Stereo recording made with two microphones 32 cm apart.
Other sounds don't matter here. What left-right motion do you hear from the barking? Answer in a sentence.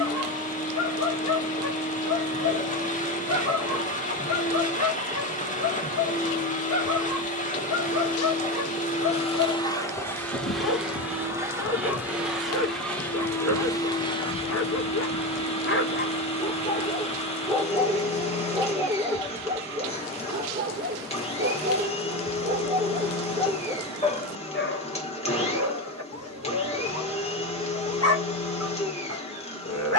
You can hear the barking go right and come back.